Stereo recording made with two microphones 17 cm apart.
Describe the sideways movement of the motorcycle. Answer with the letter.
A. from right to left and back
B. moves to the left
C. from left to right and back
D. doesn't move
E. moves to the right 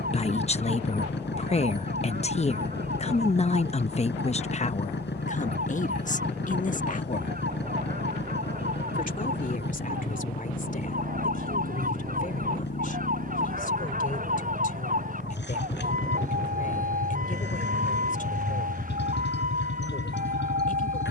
D.